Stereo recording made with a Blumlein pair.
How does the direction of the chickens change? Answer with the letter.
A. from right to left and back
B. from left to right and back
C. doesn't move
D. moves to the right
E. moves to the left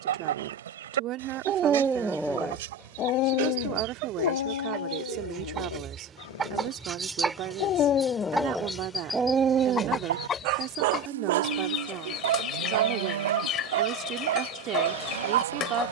E.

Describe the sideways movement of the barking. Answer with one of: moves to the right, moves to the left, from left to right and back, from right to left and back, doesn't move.
from right to left and back.